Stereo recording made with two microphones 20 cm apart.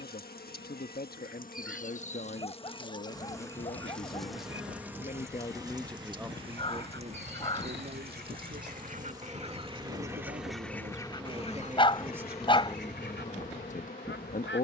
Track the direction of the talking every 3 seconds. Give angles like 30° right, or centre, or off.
50° left, 40° left, 30° right, 40° right, 20° left.